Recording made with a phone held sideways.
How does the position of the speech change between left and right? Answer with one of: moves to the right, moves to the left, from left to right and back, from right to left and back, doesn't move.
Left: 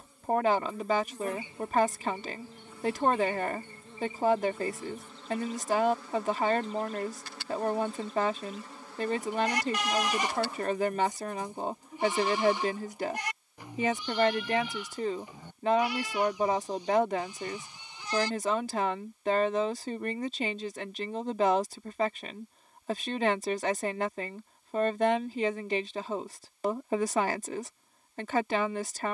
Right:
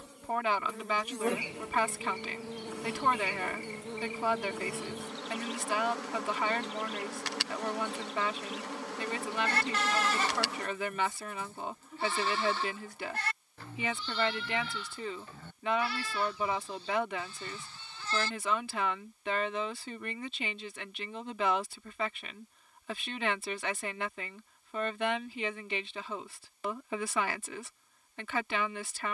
doesn't move.